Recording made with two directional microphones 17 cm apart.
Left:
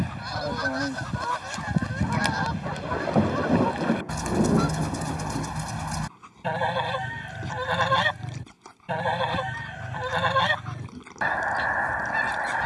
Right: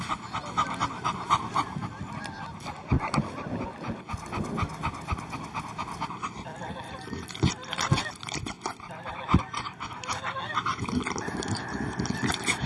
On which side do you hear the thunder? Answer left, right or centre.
left.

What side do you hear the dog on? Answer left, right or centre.
right.